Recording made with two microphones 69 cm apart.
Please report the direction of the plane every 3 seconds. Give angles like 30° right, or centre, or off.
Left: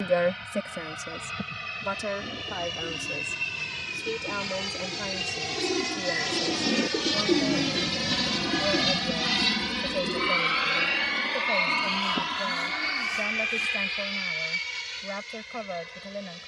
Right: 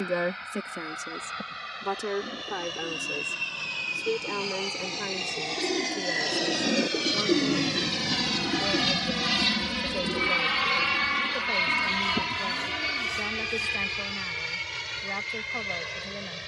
60° left, 50° left, 20° left, 30° right, 60° right, 70° right.